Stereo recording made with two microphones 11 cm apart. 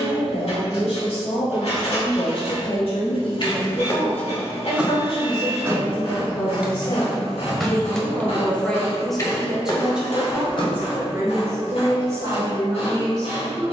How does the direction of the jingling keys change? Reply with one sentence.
In this clip you hear the jingling keys go right and come back.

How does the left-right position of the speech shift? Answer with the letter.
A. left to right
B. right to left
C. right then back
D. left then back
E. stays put
A.